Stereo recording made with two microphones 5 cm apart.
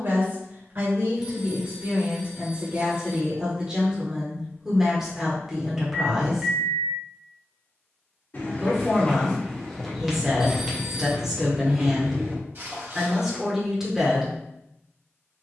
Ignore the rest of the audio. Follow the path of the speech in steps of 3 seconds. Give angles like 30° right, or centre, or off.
40° right, 10° right, 10° right, 10° right, 10° right.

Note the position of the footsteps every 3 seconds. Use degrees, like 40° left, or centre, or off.
off, off, 30° left, 10° right, 50° right.